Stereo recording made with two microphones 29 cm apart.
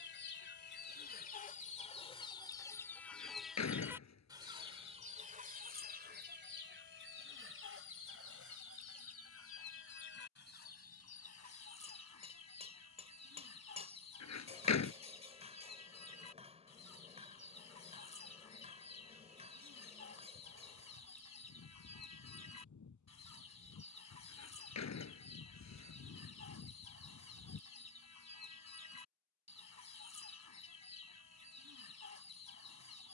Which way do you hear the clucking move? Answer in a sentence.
You can hear the clucking travel towards the right.